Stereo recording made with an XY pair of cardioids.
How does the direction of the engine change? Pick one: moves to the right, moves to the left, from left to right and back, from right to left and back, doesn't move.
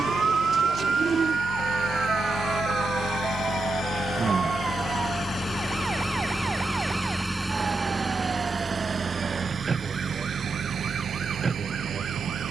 moves to the right.